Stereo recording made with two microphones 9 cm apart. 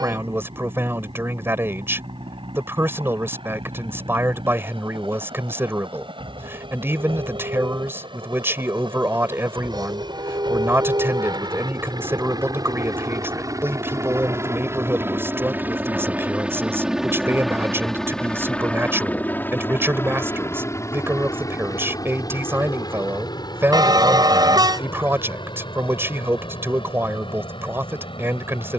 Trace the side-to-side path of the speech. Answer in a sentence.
In this clip you hear the speech stay in one place.